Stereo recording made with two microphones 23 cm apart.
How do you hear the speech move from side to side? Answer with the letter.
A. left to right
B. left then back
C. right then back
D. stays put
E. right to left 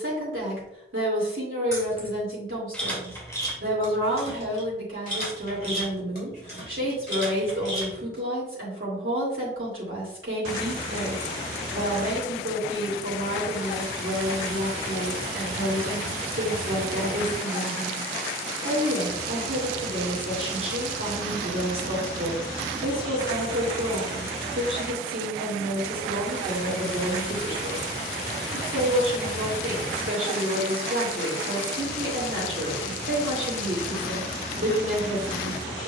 D.